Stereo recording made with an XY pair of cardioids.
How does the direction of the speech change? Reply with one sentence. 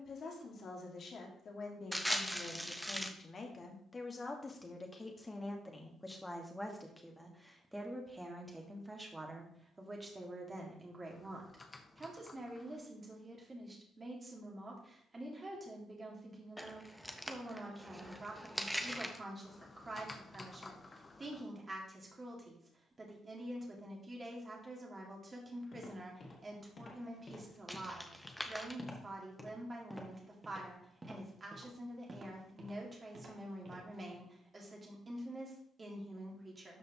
In this clip you hear the speech move to the right.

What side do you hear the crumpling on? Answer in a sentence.
In this clip you hear the crumpling in the centre.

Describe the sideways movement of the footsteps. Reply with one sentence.
In this clip you hear the footsteps go from the left side to the right.